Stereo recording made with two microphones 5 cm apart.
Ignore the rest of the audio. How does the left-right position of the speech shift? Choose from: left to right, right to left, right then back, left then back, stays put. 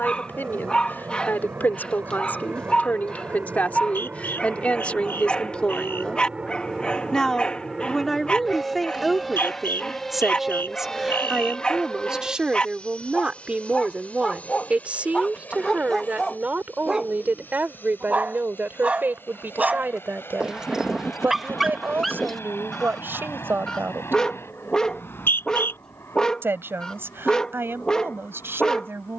left to right.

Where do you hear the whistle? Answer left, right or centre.
left.